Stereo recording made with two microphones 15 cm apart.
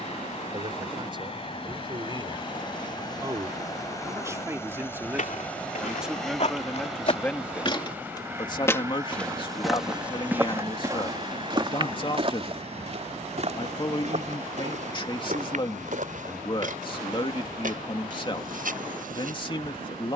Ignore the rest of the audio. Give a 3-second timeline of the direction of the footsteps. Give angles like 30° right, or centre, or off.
off, 60° left, 40° left, 10° right, 50° right, 60° right, 70° right.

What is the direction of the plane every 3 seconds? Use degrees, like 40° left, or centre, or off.
40° left, 20° left, 10° right, 30° right, 40° right, 50° right, 60° right.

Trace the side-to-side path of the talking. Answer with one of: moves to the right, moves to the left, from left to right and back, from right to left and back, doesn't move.
moves to the left.